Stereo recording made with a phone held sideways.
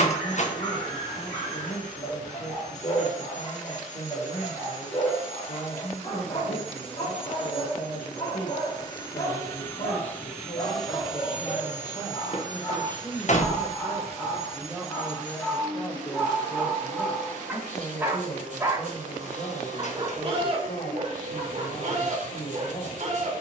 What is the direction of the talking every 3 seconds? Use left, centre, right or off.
left, left, left, left, centre, left, left, left.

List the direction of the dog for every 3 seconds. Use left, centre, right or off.
left, left, left, left, left, centre, right, right.